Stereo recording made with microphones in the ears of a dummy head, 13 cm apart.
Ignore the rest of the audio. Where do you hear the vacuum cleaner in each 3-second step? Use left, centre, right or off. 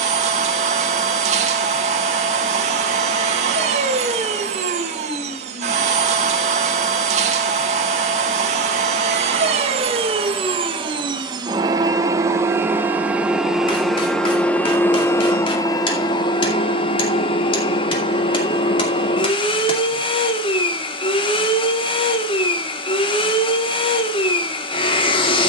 right, right, right, right, centre, left, left, left, left.